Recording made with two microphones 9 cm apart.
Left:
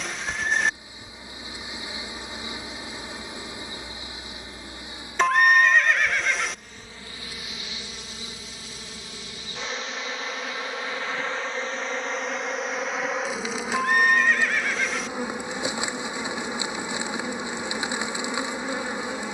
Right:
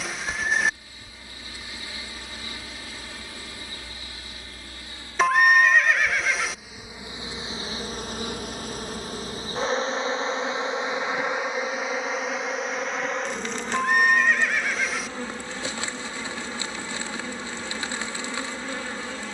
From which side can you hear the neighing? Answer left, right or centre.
centre.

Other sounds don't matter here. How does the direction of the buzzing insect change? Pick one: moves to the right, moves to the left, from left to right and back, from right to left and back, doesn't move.
from left to right and back.